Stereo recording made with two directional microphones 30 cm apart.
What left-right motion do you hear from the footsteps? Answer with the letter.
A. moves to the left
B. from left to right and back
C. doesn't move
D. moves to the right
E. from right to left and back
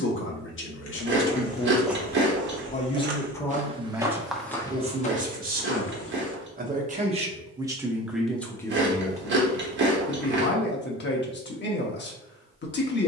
B.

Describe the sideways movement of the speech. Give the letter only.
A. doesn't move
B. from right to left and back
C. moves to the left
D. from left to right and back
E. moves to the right
D.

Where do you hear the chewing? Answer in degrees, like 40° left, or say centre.
40° right.